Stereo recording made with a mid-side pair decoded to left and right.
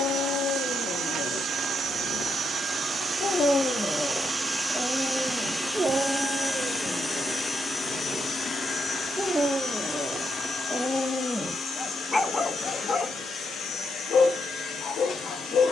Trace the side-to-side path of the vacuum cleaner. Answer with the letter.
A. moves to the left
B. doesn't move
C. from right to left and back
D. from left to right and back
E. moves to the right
A.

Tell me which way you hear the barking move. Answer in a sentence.
In this clip you hear the barking go right and come back.